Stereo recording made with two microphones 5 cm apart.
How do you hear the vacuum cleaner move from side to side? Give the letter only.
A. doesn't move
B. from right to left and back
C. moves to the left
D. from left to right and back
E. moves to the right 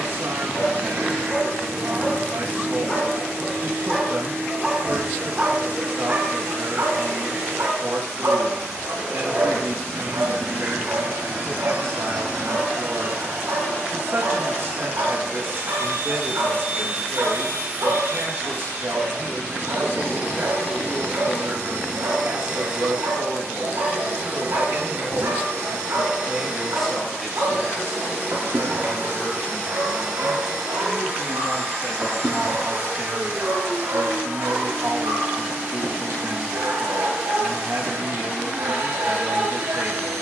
A.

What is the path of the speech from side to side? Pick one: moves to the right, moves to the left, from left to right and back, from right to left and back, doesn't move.
from right to left and back.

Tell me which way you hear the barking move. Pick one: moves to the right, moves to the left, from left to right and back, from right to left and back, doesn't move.
moves to the right.